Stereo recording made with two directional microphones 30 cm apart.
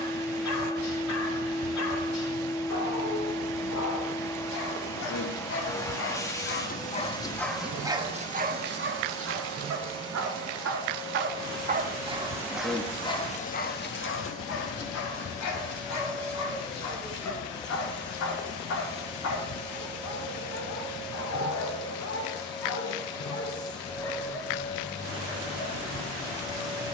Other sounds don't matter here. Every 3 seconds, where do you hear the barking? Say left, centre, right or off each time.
left, left, centre, right, left, left, left, left, left.